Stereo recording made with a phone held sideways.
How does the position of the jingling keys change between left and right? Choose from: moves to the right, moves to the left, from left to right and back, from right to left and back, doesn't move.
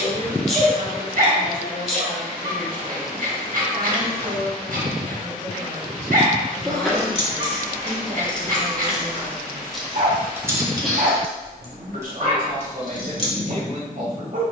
from left to right and back.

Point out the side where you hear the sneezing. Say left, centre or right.
centre.